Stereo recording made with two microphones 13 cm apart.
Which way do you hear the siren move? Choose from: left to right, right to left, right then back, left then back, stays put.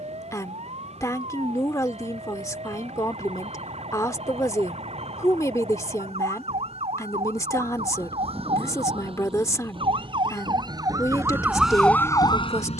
right to left.